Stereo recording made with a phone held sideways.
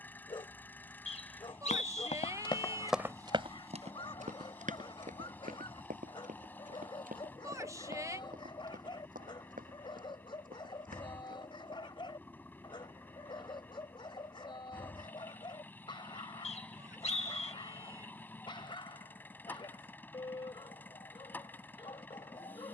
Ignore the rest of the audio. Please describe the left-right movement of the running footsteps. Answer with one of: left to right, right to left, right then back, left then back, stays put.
left to right.